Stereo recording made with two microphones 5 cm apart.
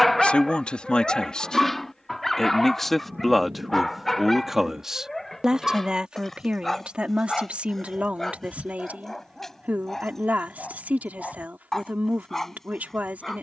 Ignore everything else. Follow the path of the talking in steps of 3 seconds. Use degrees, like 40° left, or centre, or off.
20° left, 10° right, 30° right, 30° right, 30° right.